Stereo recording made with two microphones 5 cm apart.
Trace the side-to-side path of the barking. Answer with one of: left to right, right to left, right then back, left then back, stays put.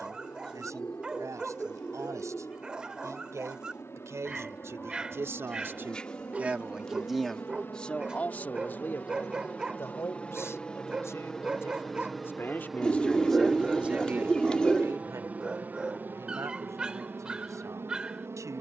stays put.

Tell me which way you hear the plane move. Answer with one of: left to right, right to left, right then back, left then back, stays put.
left to right.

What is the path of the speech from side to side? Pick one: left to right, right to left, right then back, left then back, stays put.
left then back.